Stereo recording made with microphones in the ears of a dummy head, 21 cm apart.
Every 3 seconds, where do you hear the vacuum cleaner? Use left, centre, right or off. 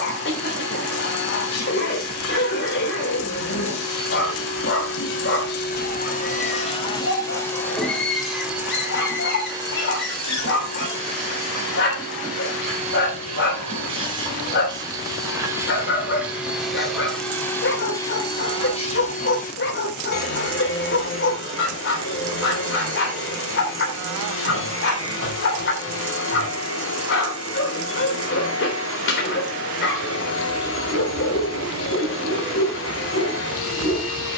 left, left, centre, right, right, centre, left, left, left, left, left, left.